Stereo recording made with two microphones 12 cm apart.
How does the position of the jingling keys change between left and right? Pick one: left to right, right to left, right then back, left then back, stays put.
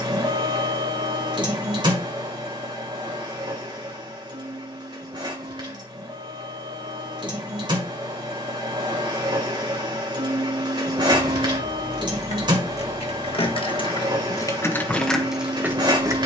left to right.